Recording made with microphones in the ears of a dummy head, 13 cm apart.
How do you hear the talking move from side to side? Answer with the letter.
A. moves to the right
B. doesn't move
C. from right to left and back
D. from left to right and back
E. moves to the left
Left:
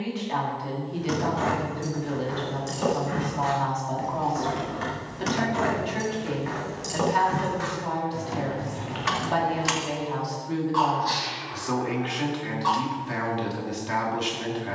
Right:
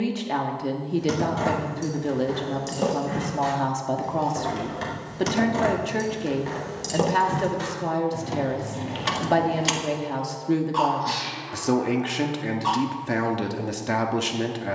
B.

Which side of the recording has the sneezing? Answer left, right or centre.
right.